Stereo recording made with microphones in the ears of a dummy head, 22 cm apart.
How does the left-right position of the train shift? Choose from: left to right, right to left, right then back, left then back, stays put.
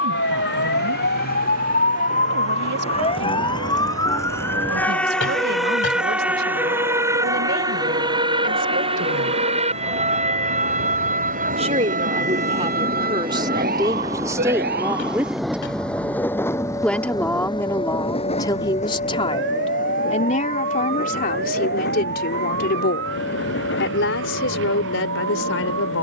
right to left.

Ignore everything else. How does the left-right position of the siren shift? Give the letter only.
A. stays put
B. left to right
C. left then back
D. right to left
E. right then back
B.